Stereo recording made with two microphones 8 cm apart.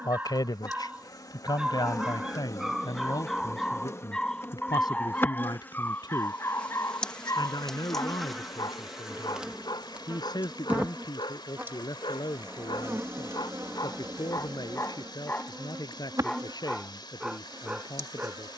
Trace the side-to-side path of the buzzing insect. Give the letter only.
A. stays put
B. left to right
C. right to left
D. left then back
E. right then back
B.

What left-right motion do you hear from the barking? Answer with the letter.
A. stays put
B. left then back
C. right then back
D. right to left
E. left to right
B.